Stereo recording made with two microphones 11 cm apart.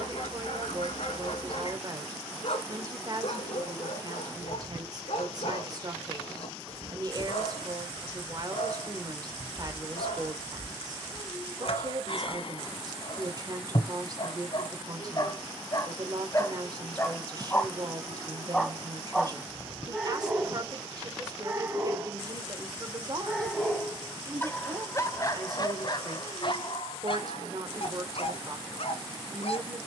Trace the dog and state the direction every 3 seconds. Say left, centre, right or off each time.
left, left, left, left, left, left, centre, centre, left, left.